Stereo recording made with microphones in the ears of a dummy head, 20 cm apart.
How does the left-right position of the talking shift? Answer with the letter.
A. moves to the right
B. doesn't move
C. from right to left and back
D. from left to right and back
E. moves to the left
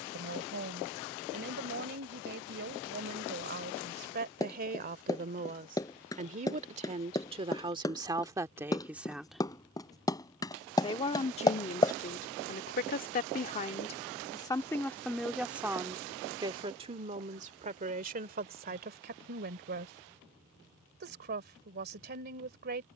C.